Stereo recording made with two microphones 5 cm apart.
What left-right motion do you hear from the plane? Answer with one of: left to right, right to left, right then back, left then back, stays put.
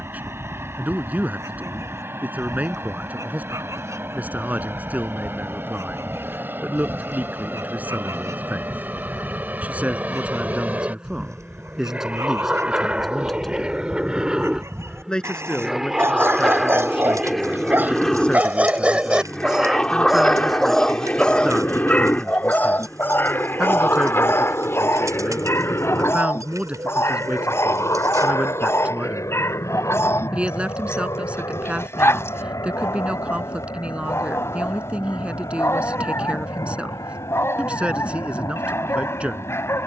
right to left.